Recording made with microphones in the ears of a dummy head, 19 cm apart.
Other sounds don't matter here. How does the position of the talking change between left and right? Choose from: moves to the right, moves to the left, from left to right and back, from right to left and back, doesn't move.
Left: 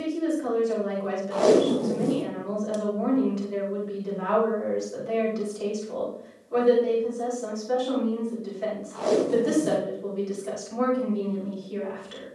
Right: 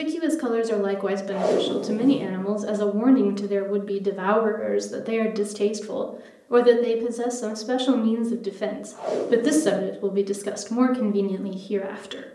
doesn't move.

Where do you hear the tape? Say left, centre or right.
left.